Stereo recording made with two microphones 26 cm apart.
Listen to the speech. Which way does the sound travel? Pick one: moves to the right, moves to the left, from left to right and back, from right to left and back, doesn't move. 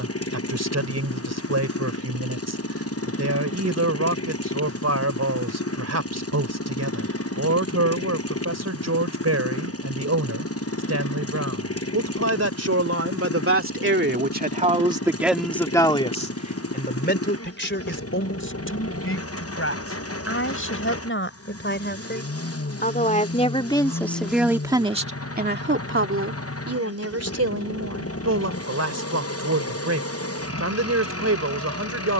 from right to left and back.